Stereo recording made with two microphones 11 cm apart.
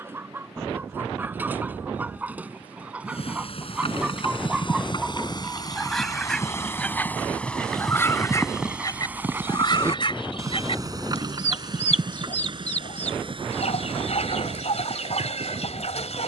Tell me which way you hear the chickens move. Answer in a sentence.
In this clip you hear the chickens travel towards the left.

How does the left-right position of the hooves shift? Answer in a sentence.
In this clip you hear the hooves move to the right.